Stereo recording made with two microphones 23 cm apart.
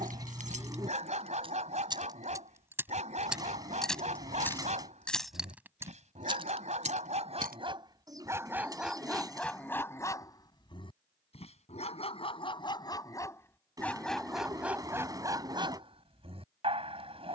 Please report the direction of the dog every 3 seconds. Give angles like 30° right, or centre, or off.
30° right, 30° right, 20° right, 10° left, 10° left, 20° right.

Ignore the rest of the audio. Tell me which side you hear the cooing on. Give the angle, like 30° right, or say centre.
20° right.